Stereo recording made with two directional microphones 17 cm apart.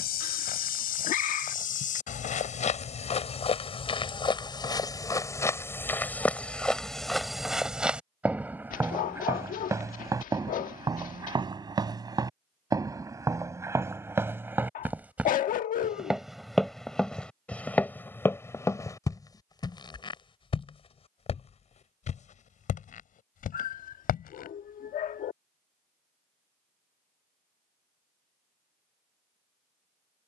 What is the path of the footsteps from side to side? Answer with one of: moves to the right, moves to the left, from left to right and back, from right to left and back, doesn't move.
from left to right and back.